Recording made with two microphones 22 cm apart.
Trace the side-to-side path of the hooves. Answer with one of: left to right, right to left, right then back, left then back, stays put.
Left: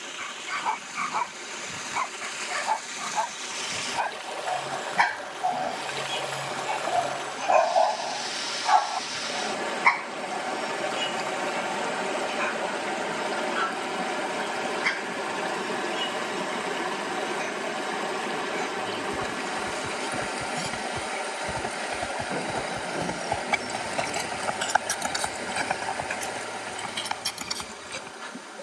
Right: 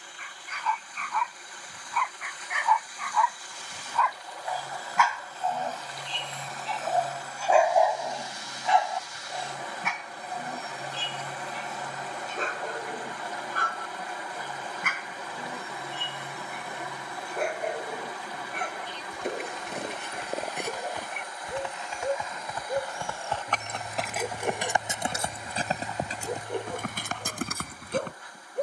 left to right.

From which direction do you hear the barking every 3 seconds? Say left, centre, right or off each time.
left, left, centre, right, right, right, right, right, right, right.